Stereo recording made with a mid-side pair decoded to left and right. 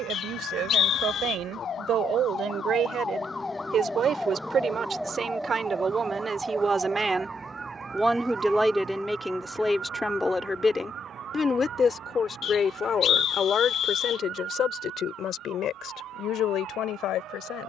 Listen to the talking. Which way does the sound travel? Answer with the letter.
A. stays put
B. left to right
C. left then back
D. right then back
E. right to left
E.